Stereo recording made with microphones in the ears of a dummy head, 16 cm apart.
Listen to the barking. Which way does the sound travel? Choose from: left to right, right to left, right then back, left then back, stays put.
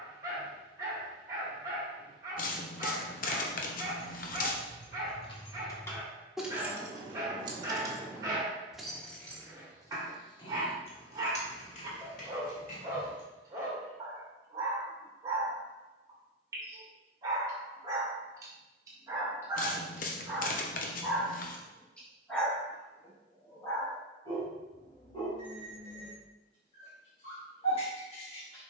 right to left.